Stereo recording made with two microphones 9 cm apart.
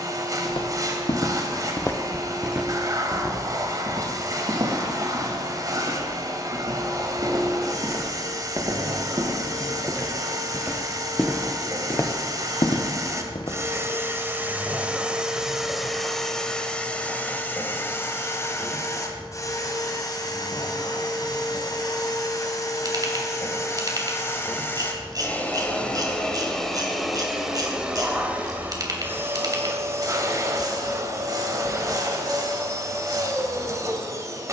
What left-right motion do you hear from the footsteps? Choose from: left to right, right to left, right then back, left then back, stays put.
right then back.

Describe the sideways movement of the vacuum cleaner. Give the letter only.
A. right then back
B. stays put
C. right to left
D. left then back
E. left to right
D.